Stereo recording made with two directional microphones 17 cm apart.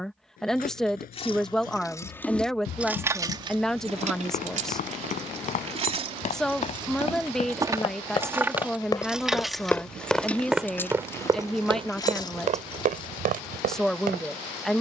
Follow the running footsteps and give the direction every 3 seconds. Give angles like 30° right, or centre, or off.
60° left, 50° left, 40° left, 10° right, 50° right.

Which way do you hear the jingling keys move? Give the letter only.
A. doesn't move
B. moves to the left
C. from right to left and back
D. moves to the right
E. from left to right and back
E.